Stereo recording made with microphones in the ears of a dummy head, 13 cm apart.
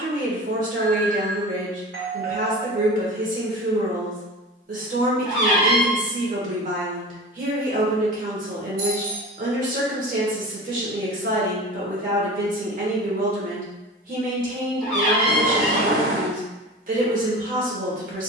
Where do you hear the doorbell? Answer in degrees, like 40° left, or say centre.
60° right.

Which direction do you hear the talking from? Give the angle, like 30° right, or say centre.
60° right.